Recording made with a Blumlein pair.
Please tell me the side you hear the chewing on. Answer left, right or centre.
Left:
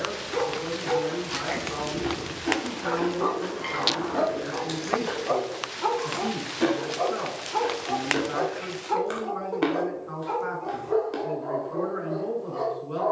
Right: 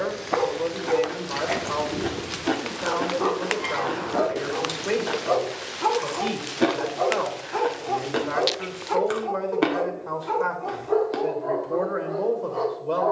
centre.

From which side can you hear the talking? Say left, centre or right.
right.